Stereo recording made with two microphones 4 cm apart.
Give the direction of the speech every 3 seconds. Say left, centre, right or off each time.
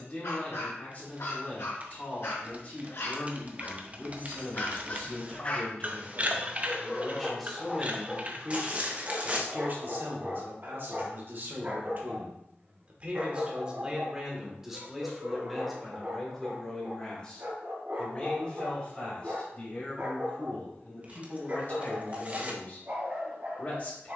left, left, centre, right, right, centre, left, left.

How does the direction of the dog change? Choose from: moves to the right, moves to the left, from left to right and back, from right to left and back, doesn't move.
moves to the right.